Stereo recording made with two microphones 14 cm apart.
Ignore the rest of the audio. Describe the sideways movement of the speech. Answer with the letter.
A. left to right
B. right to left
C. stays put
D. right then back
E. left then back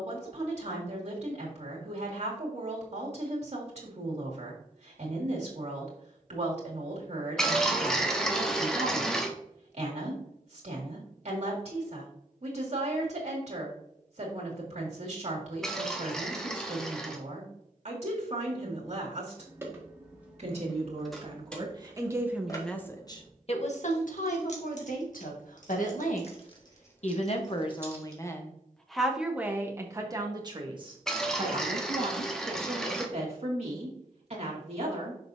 E.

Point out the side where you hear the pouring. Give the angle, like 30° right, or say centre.
centre.